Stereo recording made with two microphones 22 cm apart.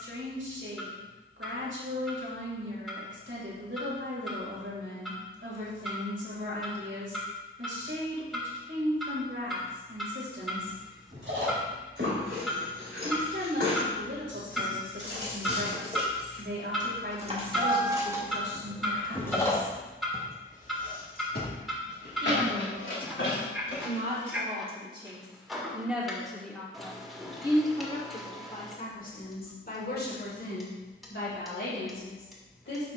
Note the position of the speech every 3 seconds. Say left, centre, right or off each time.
right, right, right, right, right, right, right, right, centre, left, left.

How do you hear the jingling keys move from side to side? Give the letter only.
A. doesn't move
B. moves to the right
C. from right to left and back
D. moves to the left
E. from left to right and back
D.